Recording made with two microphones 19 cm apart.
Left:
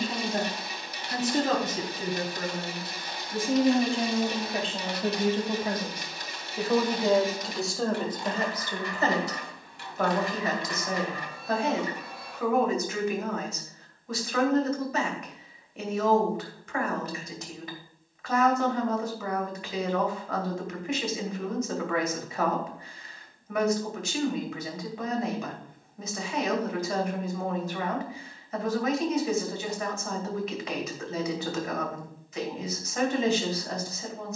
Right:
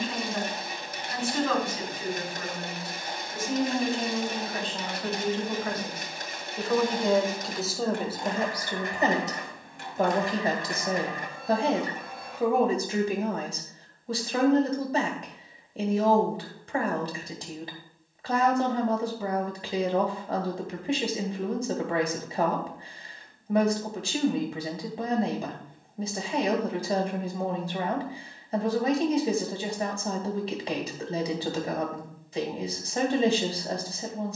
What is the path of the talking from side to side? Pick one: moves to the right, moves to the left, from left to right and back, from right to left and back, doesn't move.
moves to the right.